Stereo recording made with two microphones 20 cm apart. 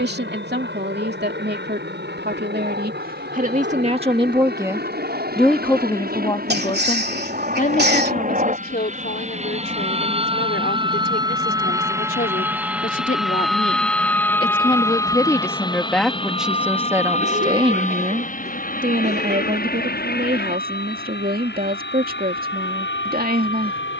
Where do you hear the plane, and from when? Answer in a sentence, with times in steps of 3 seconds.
You can hear the plane on the right from 0 s, in the centre from 12 s and on the left from 15 s.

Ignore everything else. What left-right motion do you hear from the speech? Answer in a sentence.
You can hear the speech move from right to left and back again.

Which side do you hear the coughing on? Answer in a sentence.
You can hear the coughing on the right.